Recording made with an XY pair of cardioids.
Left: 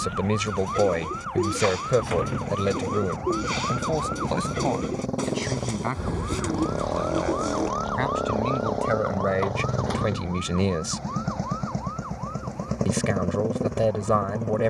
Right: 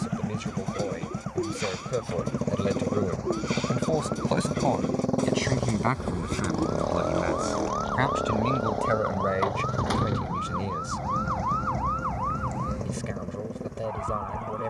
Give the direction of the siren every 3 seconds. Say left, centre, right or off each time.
left, left, centre, right, right.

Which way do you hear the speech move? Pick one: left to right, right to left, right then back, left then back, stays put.
right then back.